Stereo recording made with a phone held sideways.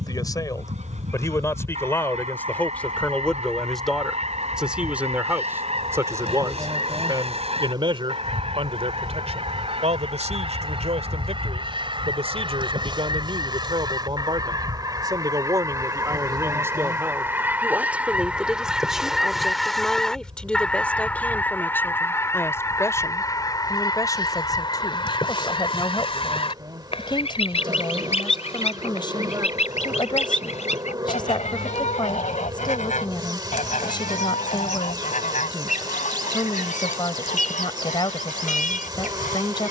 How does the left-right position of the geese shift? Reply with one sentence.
In this clip you hear the geese travel towards the left.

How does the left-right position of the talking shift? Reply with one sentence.
You can hear the talking go right and come back.